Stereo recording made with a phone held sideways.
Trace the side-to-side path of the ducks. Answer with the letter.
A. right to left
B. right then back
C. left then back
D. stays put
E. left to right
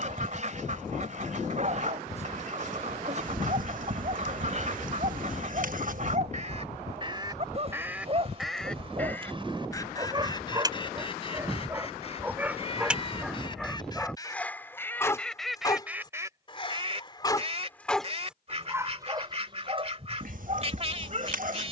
C.